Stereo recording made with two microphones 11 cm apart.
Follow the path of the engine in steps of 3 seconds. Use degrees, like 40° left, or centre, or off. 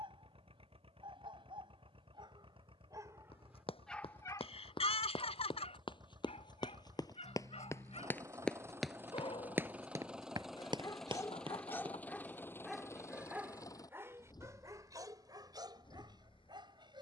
60° right, 50° right, 30° right, centre, 30° left, 50° left.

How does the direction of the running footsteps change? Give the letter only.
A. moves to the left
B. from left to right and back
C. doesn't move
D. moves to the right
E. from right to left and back
D.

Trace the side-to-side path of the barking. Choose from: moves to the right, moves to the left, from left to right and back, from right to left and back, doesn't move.
from right to left and back.